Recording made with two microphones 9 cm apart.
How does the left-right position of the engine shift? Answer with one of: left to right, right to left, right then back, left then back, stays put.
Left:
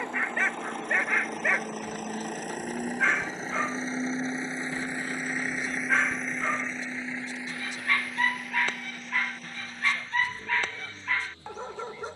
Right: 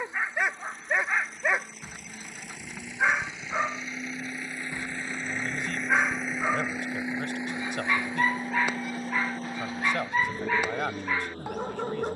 left to right.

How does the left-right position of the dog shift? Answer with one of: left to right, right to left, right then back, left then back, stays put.
stays put.